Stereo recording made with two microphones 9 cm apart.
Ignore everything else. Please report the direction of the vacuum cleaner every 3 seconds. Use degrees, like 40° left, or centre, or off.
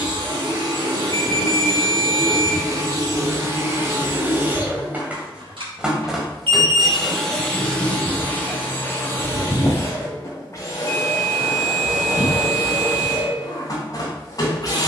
50° right, 30° right, 10° left, 30° left, 40° left.